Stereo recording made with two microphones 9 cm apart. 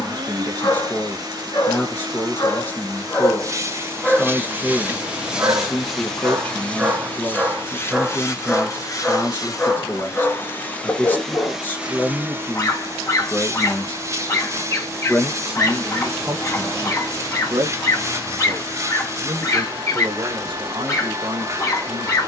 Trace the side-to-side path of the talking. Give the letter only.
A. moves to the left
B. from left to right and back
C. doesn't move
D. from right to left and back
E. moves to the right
E.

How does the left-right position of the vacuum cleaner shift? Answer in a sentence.
In this clip you hear the vacuum cleaner go left and come back.